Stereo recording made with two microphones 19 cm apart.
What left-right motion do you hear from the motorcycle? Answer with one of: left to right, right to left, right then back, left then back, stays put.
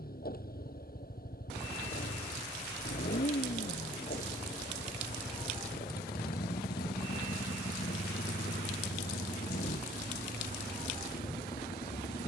stays put.